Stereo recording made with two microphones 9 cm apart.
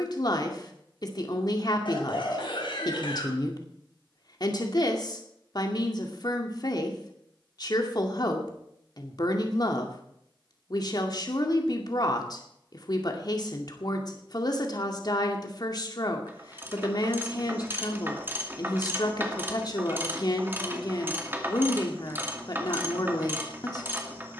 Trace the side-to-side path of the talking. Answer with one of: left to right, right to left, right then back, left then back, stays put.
stays put.